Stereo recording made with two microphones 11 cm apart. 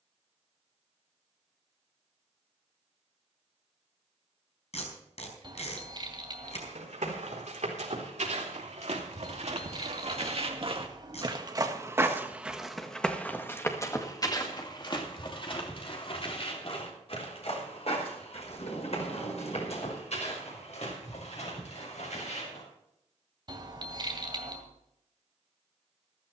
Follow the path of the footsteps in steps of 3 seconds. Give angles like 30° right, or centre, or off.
off, off, 80° right, 50° right, 20° left, 50° left, 60° left, 70° left, off.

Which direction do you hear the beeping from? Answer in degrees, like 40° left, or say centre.
40° right.